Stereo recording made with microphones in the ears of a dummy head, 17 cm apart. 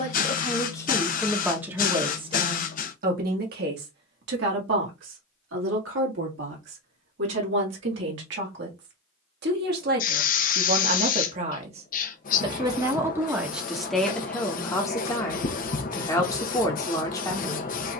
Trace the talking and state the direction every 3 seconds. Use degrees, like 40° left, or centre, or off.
centre, 60° right, 70° right, 50° right, centre, 20° left.